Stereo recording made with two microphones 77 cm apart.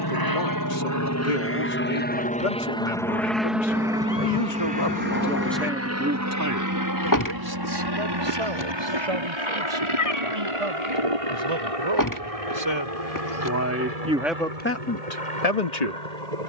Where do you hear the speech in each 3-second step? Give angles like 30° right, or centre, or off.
80° left, 40° left, 30° right, 40° right, 10° right, 50° left.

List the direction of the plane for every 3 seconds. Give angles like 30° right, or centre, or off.
20° left, 10° right, 30° right, 40° right, 40° right, 50° right.